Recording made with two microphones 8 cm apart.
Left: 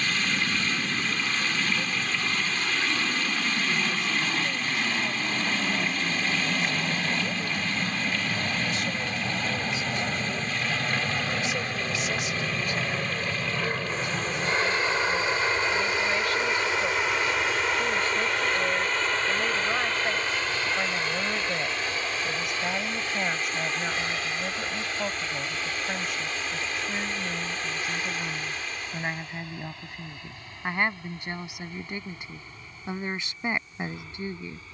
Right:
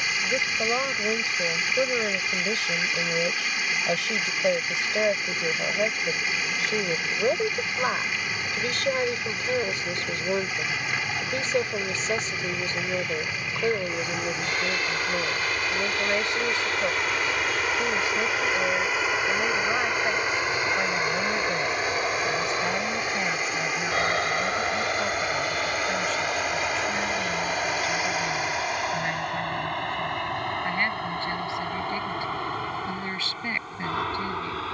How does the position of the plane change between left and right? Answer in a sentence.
You can hear the plane travel towards the right.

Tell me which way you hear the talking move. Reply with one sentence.
You can hear the talking move from right to left.